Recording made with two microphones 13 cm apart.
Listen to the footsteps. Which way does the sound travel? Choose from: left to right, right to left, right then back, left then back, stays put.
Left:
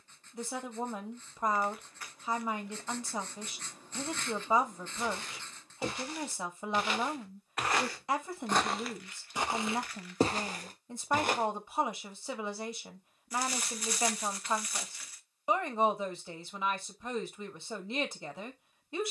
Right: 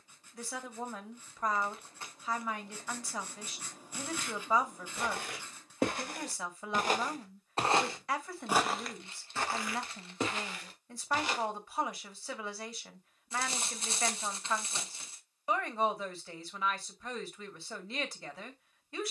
right to left.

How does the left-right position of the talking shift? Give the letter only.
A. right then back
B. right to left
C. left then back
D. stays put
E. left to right
D.